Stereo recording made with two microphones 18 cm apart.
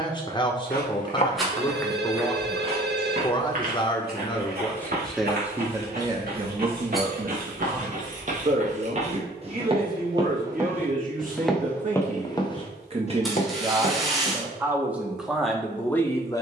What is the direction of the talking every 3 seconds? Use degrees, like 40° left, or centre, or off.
30° left, 10° left, 40° right, 50° right, 30° right, 10° left.